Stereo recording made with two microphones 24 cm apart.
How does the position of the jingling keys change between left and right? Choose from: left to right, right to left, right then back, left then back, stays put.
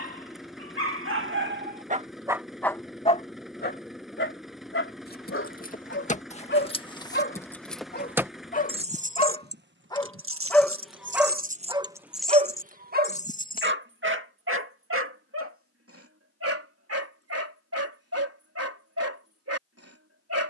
right then back.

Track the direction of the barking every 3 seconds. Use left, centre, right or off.
right, left, left, centre, right, right, right.